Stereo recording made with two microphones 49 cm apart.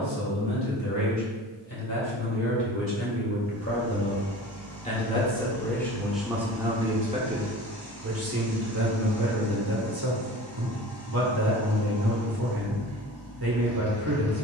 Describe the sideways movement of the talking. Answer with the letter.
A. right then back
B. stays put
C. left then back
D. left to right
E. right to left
D.